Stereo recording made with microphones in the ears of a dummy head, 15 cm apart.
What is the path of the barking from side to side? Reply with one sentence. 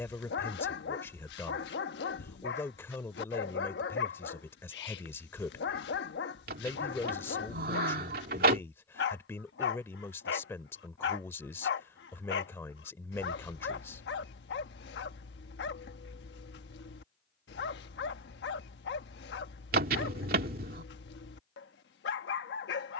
You can hear the barking stay put.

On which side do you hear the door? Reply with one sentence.
In this clip you hear the door on the right.